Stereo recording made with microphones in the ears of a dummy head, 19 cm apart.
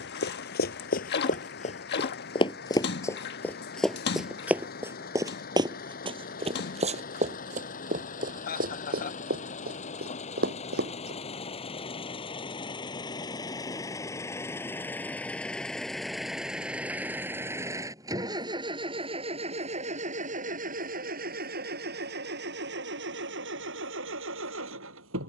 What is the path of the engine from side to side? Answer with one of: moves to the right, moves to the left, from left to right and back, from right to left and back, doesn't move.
moves to the right.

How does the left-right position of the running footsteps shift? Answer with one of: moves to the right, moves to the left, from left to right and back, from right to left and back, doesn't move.
moves to the right.